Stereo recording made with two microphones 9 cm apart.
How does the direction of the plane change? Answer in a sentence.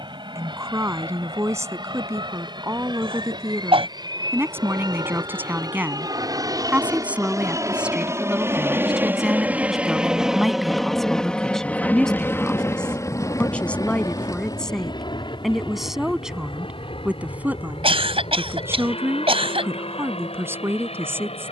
In this clip you hear the plane go from the right side to the left.